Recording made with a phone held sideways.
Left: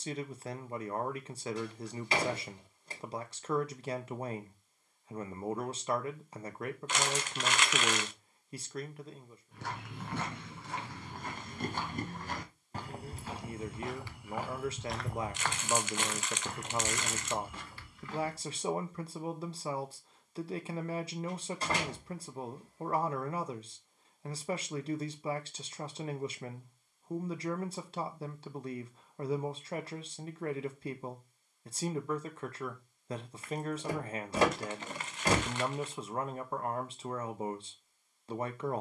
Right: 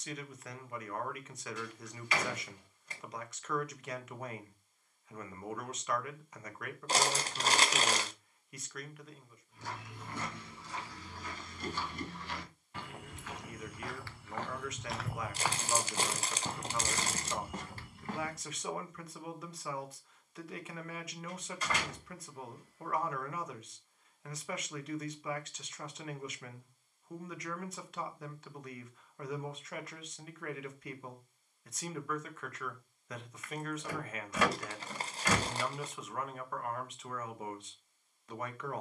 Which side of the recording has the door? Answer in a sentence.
You can hear the door on the left.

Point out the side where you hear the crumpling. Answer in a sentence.
You can hear the crumpling on the right.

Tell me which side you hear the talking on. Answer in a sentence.
In this clip you hear the talking on the left.